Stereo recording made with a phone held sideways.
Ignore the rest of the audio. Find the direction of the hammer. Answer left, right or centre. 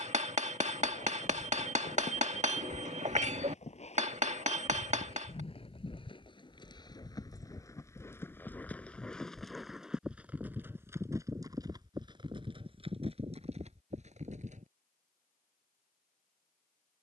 right.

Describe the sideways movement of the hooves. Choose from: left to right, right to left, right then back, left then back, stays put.
left to right.